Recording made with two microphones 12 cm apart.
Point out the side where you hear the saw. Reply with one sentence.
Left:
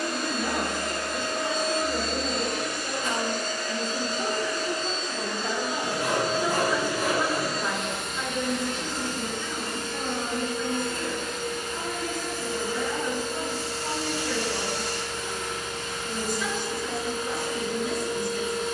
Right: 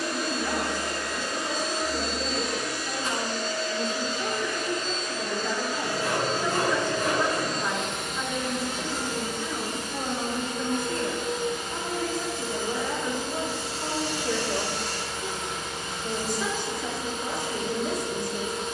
In this clip you hear the saw on the left.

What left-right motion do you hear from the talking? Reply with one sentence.
You can hear the talking travel towards the right.